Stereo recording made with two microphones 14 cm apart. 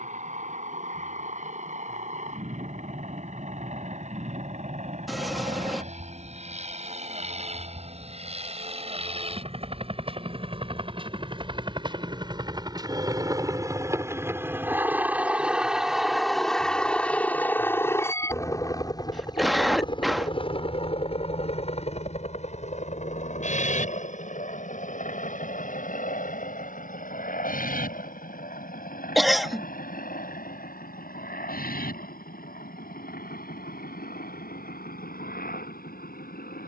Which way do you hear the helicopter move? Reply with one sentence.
You can hear the helicopter go from the right side to the left.